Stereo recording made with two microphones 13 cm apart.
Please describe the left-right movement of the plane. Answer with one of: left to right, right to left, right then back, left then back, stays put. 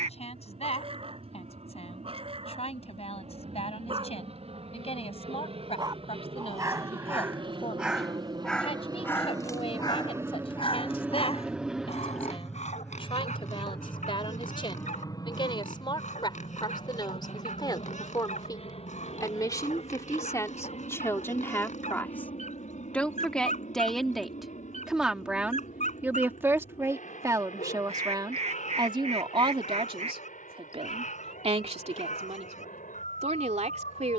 right to left.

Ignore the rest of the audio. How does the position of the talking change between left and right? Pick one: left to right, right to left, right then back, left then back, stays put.
left to right.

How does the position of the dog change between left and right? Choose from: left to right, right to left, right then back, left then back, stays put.
right to left.